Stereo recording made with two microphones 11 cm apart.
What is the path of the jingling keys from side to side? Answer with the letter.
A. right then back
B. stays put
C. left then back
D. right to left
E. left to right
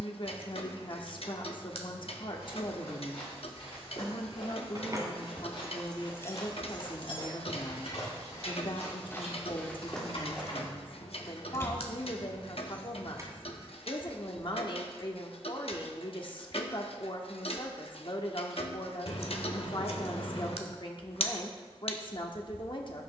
C.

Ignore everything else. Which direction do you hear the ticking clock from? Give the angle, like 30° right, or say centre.
60° left.